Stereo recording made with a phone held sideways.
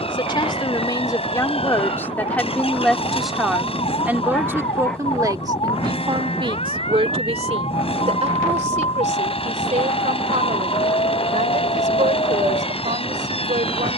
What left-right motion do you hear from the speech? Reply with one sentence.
In this clip you hear the speech move from left to right.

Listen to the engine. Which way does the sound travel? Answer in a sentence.
In this clip you hear the engine stay put.